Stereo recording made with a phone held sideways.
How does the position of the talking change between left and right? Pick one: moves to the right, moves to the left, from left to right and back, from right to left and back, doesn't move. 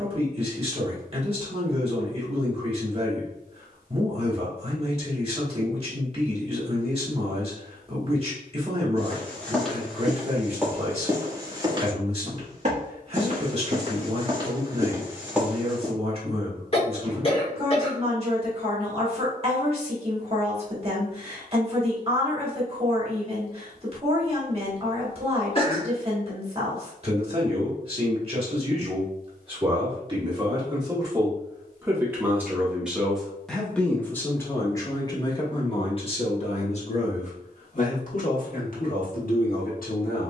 moves to the left.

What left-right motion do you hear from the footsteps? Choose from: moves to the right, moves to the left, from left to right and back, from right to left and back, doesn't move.
from left to right and back.